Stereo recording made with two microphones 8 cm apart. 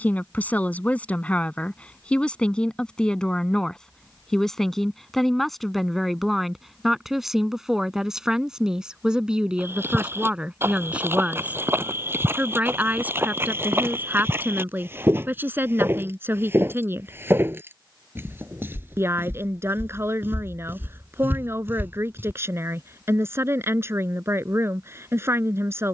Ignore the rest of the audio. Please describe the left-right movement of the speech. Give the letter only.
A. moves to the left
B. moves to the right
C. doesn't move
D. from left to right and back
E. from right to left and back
B.